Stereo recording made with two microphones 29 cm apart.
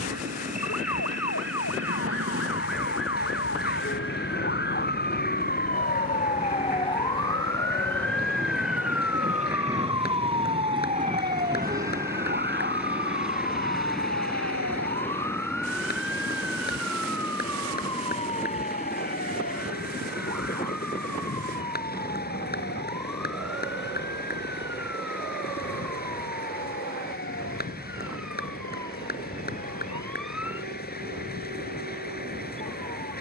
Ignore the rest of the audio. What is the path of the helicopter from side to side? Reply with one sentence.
You can hear the helicopter move from right to left.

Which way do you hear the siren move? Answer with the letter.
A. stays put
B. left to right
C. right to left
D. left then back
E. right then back
B.